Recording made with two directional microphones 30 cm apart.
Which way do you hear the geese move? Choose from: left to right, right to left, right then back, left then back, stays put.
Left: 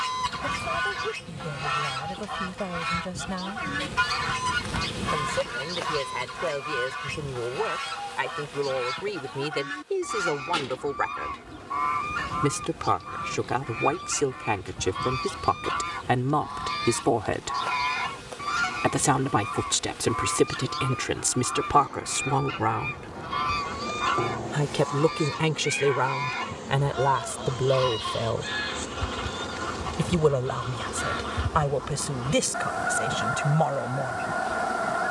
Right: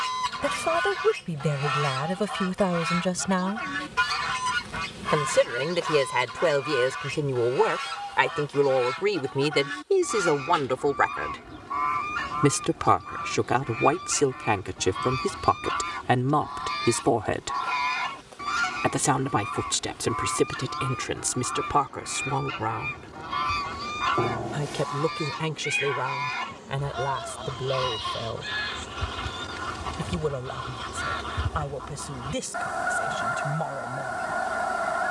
stays put.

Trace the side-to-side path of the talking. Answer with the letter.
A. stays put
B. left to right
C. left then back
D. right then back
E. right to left
E.